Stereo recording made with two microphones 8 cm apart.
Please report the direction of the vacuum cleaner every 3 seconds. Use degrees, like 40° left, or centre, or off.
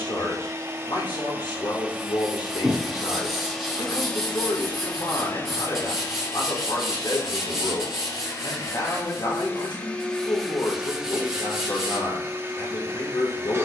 20° right, 20° left, 40° left, centre, 30° right.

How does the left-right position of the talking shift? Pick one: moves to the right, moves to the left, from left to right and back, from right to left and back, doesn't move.
doesn't move.